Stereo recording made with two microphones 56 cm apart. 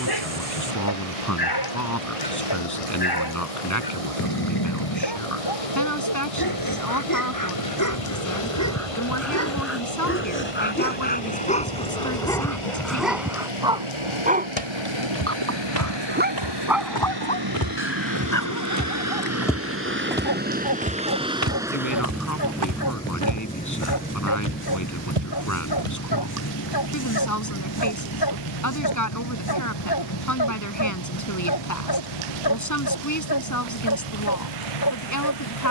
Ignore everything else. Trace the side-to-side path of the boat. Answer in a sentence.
You can hear the boat move to the left.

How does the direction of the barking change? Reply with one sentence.
You can hear the barking go right and come back.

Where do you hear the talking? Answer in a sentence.
In this clip you hear the talking on the left.